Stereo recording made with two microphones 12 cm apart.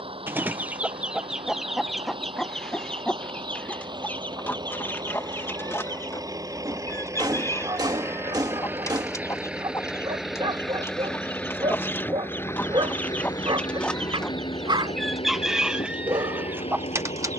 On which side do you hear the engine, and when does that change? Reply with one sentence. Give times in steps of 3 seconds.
You can hear the engine on the right from 0 s, in the centre from 9 s and on the left from 12 s.